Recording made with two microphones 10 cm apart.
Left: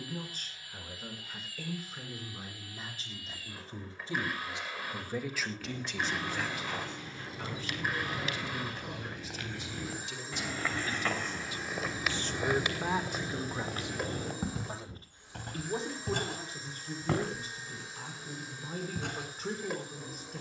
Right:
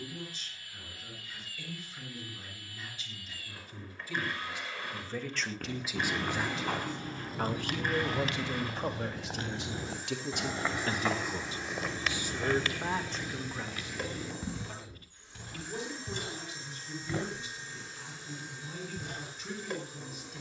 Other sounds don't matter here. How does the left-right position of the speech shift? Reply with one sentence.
In this clip you hear the speech move from left to right and back again.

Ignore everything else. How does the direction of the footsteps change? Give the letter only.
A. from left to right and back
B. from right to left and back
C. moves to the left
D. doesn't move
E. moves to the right
C.